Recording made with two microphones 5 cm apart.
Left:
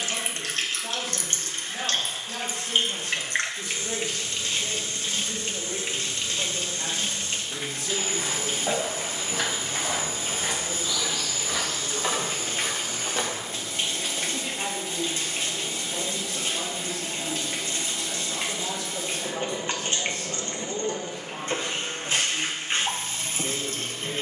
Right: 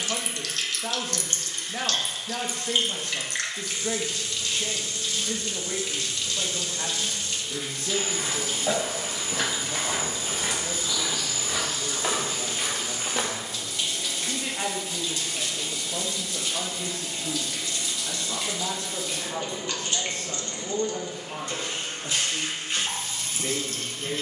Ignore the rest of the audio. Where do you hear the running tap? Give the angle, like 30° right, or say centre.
30° left.